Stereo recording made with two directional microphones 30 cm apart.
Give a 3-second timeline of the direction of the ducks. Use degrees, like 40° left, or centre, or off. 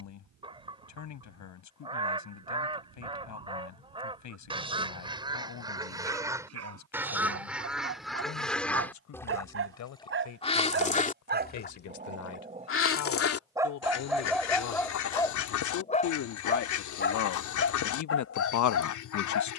20° right, 20° right, centre, 20° left, 50° left, 70° left, 70° left.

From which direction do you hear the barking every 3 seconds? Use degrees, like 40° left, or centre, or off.
60° right, 60° right, 50° right, 40° right, 10° right, 30° left, 50° left.